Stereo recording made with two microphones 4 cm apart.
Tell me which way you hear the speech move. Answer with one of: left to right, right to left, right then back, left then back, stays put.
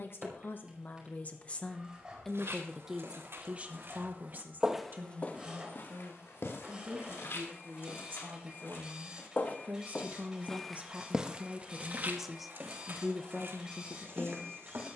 right then back.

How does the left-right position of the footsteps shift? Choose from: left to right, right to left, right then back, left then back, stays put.
left then back.